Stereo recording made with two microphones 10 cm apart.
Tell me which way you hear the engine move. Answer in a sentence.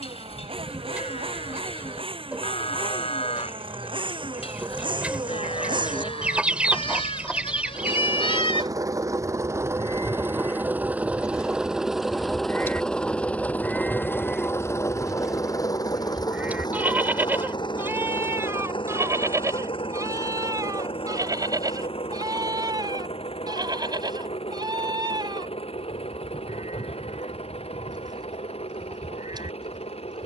You can hear the engine move to the left.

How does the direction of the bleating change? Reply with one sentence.
In this clip you hear the bleating move to the right.